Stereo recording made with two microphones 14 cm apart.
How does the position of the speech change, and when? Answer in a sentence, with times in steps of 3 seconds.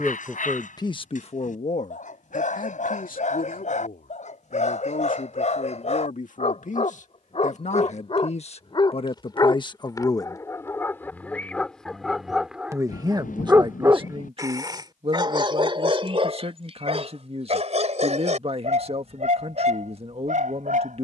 In this clip you hear the speech on the left from 0 s and on the right from 12 s.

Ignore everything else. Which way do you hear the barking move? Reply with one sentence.
In this clip you hear the barking travel towards the right.